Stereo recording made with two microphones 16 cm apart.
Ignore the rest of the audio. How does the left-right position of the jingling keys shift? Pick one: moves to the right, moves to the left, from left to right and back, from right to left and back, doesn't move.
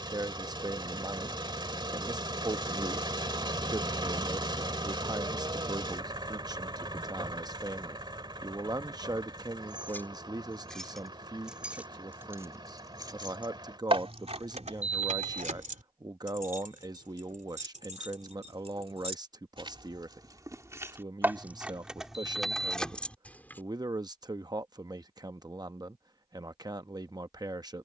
from left to right and back.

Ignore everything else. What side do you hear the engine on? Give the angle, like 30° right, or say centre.
30° right.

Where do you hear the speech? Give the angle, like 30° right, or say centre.
20° right.